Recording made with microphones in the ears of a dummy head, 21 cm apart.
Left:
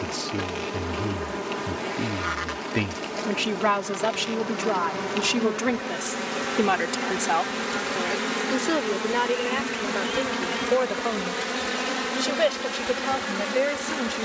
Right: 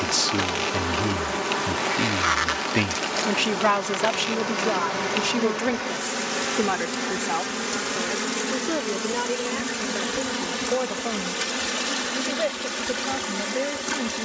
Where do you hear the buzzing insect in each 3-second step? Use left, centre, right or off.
right, right, centre, left, left.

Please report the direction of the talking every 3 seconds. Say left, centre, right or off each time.
right, centre, left, left, left.